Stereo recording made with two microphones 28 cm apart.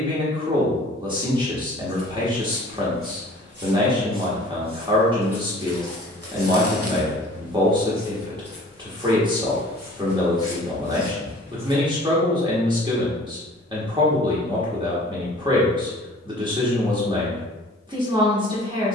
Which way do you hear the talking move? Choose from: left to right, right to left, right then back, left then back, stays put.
stays put.